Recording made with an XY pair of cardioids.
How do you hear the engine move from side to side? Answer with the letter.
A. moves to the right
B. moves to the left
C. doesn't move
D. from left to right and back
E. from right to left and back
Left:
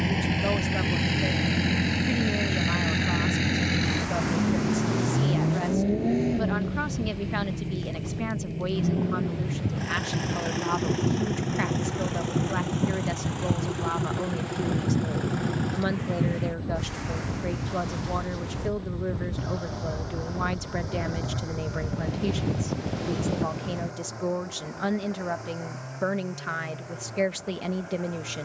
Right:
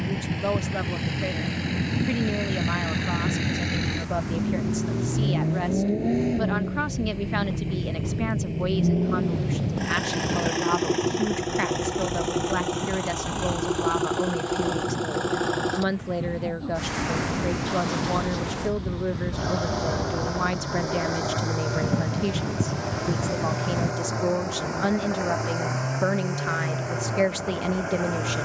A.